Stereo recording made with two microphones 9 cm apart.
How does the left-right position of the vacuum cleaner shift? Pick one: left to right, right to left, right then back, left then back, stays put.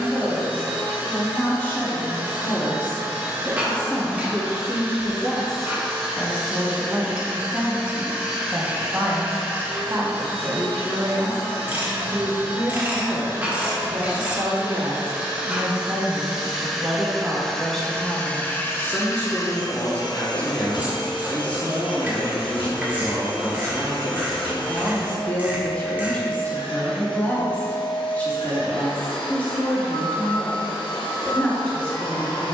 right to left.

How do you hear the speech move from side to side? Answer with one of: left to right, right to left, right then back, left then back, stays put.
right then back.